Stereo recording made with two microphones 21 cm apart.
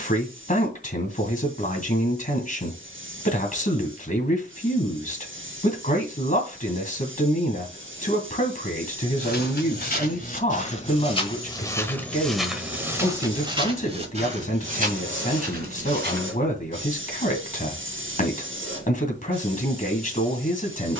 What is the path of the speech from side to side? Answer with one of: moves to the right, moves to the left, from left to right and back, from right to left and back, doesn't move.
doesn't move.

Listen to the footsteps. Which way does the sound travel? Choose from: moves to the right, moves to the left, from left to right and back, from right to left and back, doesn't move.
moves to the right.